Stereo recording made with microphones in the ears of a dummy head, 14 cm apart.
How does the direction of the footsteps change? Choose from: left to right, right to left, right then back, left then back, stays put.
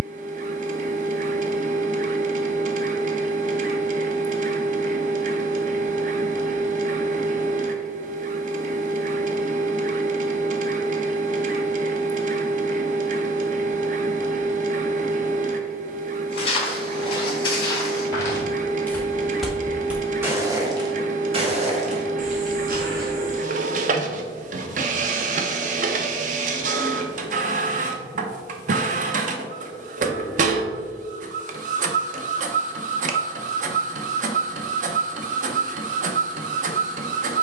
left to right.